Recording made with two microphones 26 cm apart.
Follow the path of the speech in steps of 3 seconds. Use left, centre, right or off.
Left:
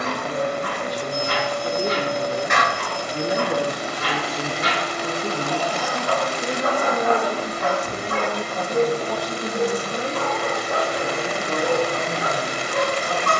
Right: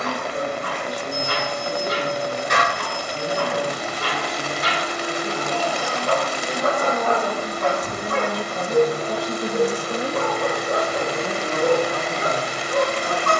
left, left, centre, right, right.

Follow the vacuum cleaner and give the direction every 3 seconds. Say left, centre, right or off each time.
left, centre, right, right, left.